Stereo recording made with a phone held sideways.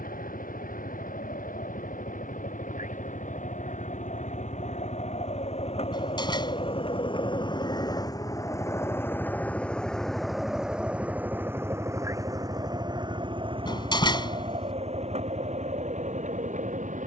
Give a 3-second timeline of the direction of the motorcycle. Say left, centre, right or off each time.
left, left, left, centre, right, right.